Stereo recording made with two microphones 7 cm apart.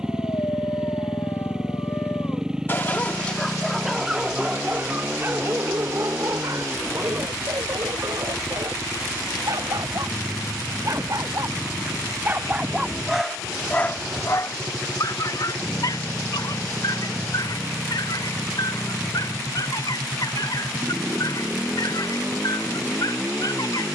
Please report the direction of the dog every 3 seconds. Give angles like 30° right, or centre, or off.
50° left, 10° right, 50° right, 50° right, 10° left, 60° left, 70° left, 70° left.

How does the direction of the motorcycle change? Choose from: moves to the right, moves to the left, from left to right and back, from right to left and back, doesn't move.
doesn't move.